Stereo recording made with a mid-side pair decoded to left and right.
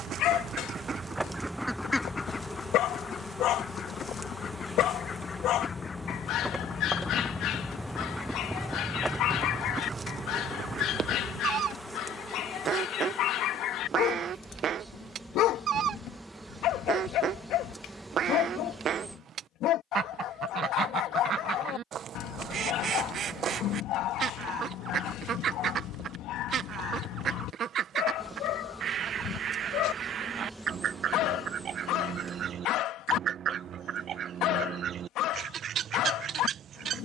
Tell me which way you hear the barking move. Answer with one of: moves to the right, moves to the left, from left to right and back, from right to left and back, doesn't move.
doesn't move.